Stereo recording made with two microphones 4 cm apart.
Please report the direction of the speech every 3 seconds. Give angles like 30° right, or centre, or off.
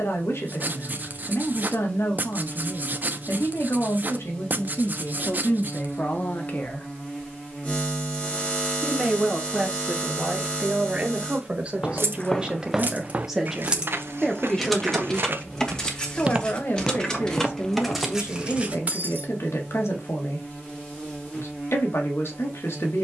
60° left, 60° left, 30° left, 20° right, centre, 50° left, 60° left, 60° left.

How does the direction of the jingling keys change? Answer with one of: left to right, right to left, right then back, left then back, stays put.
left then back.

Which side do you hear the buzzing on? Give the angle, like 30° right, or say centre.
30° left.